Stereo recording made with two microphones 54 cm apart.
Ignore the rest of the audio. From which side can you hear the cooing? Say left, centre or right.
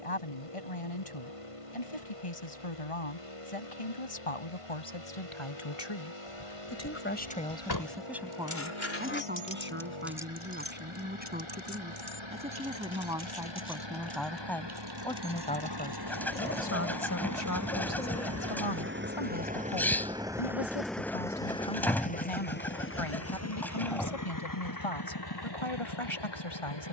centre.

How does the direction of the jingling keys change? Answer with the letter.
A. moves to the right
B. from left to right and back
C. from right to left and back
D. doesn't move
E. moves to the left
A.